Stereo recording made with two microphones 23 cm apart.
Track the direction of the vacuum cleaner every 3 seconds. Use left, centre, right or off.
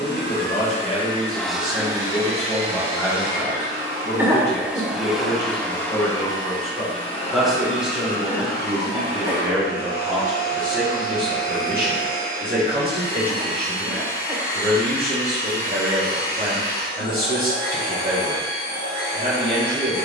centre, centre, left, left, left, left, left.